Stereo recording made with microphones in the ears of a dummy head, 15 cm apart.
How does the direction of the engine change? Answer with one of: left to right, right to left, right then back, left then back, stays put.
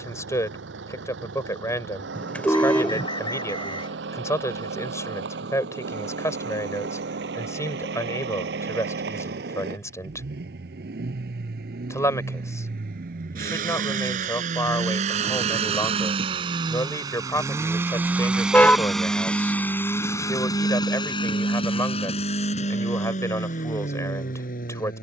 right to left.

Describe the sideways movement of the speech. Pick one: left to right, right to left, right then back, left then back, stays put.
stays put.